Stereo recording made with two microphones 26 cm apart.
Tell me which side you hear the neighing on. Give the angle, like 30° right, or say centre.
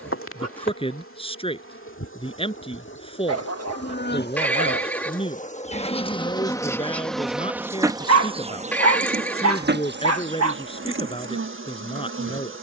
10° left.